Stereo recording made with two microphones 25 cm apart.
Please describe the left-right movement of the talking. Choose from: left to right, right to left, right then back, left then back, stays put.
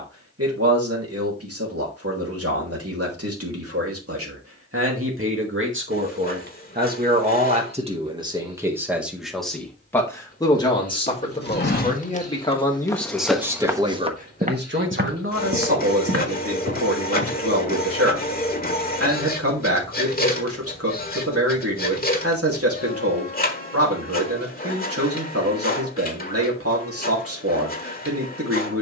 left then back.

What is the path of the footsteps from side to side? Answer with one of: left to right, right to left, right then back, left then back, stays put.
left to right.